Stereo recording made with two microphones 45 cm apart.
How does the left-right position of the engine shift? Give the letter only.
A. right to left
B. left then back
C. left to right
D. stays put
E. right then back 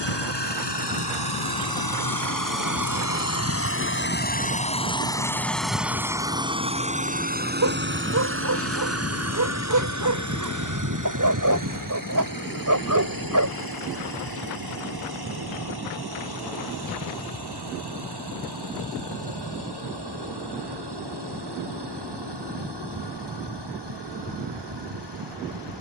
C.